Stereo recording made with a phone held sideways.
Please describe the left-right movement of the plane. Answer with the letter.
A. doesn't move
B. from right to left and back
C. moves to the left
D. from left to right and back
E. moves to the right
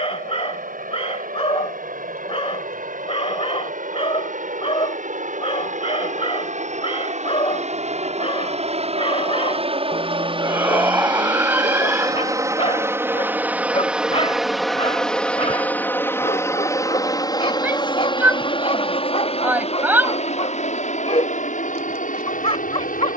C.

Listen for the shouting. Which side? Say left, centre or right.
centre.